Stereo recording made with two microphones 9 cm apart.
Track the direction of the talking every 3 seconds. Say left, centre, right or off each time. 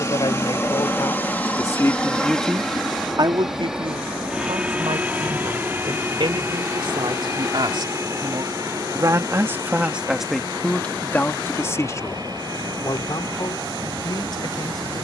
left, right, right, centre, left.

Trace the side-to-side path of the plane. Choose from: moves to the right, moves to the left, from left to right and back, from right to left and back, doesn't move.
moves to the right.